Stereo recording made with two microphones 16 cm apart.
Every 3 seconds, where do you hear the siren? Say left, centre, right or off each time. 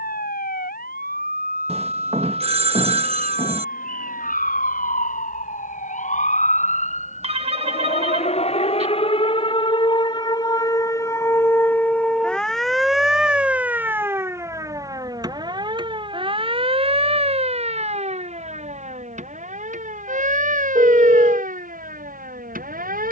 left, left, left, left, centre, right, right, right.